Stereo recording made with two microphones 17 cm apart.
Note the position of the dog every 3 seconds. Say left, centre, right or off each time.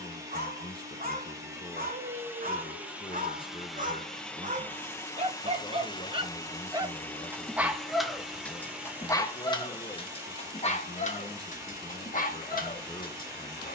right, right, centre, left, left.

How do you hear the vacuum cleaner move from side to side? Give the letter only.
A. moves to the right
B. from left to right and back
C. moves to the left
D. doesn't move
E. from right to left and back
E.